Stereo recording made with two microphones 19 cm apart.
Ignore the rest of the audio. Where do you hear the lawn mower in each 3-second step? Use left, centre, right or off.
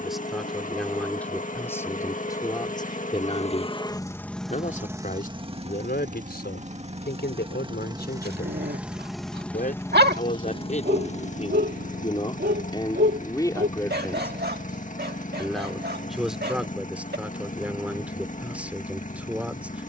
left, centre, right, left, left, left, left.